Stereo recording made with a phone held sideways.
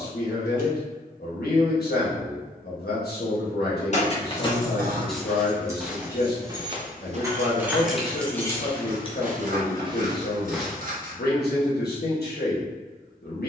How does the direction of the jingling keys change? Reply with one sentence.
In this clip you hear the jingling keys move from left to right and back again.